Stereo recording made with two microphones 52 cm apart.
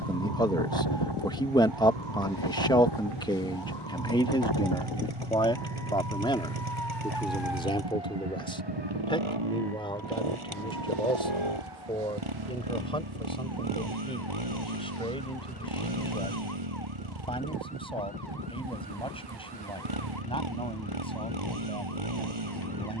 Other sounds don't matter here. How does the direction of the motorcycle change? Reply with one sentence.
In this clip you hear the motorcycle stay in one place.